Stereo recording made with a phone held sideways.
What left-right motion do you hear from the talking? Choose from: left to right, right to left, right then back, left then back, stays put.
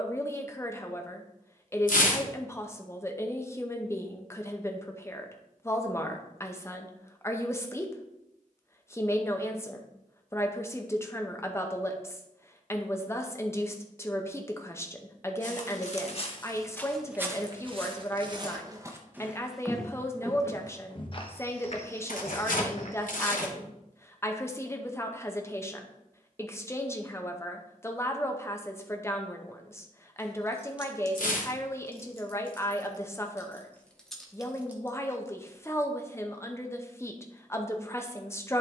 stays put.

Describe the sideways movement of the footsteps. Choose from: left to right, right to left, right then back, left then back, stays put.
right then back.